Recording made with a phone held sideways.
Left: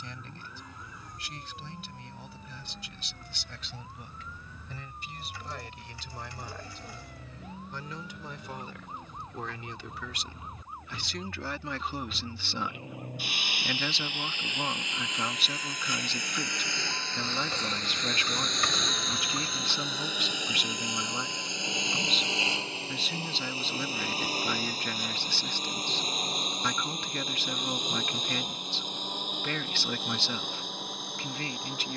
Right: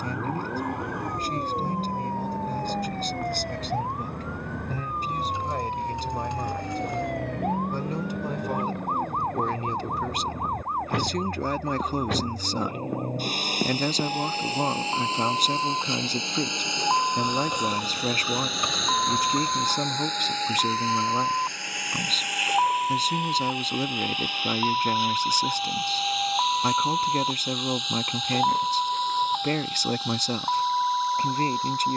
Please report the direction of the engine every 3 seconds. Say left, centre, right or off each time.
right, right, right, right, right, right, centre, left, left, left, left.